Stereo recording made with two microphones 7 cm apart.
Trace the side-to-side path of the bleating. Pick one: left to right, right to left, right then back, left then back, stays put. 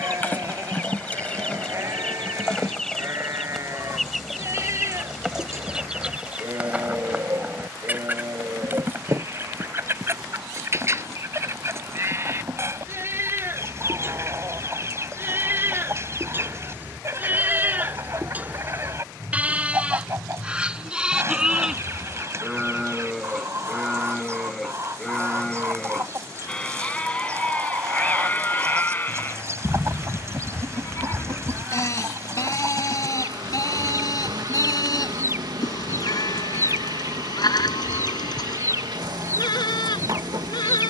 right to left.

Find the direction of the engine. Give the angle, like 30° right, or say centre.
60° right.